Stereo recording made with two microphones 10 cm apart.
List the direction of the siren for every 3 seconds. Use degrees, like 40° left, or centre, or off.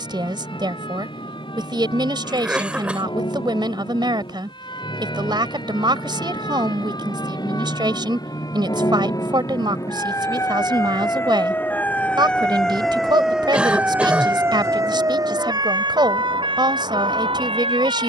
60° left, 50° left, 50° left, 30° left, 10° right, 50° right.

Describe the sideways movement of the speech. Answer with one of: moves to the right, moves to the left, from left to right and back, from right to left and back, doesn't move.
doesn't move.